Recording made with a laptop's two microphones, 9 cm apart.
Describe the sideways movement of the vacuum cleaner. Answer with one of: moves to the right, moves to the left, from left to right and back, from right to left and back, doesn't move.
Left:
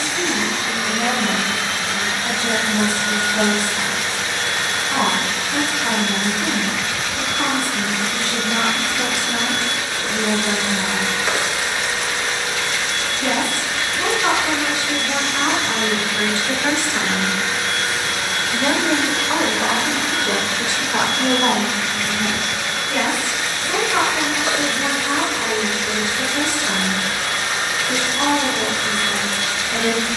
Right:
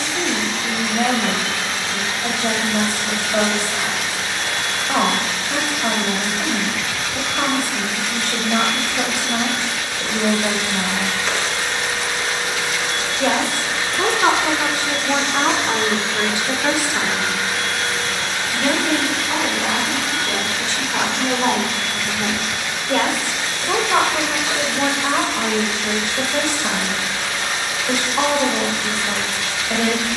from left to right and back.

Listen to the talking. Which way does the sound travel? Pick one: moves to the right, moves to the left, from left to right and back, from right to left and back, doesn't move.
from right to left and back.